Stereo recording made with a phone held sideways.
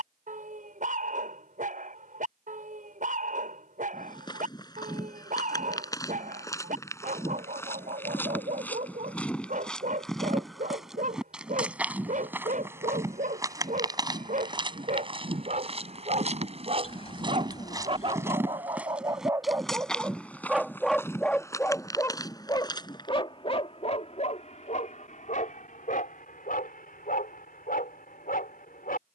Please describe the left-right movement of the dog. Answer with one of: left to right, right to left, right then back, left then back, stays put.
right to left.